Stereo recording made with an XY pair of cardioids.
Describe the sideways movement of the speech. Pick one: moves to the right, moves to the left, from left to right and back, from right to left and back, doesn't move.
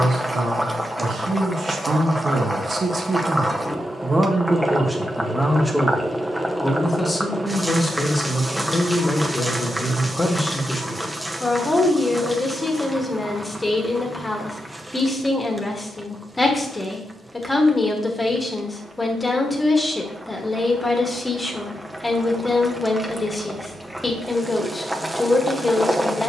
moves to the left.